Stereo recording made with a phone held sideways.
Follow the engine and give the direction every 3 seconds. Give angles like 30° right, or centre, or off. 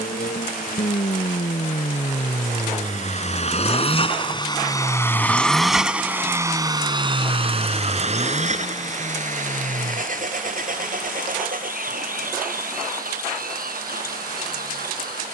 60° left, 30° left, 40° right, 60° right, 70° right.